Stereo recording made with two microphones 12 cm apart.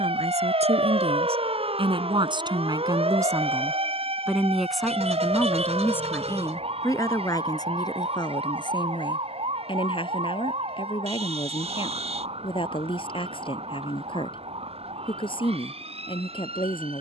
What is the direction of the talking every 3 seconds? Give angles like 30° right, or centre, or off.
50° right, centre, 30° left, 50° left, 50° left, 50° left.